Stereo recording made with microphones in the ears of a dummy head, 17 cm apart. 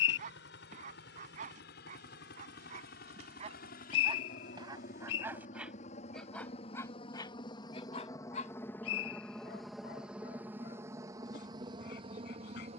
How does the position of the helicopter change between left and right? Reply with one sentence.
In this clip you hear the helicopter move from left to right.